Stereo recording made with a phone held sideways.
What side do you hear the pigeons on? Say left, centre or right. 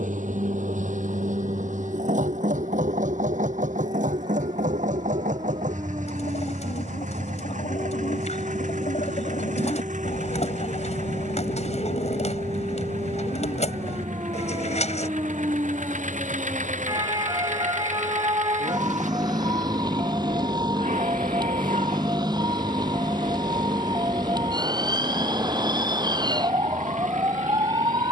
left.